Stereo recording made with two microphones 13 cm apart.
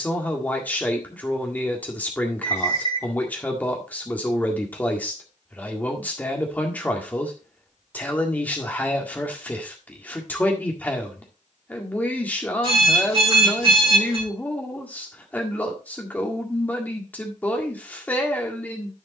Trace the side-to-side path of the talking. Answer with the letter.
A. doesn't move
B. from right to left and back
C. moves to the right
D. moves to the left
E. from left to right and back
A.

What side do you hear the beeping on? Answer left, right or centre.
right.